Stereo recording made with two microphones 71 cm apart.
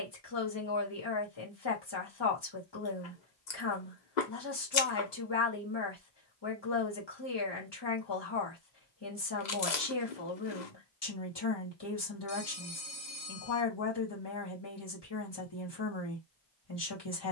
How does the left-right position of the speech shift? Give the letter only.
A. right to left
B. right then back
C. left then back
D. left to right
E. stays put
E.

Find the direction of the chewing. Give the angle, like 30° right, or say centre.
70° left.